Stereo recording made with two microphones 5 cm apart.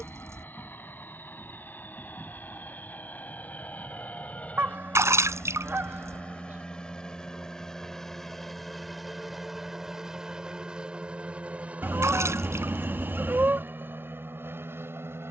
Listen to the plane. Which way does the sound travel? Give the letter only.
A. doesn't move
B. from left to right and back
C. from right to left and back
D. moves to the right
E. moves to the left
D.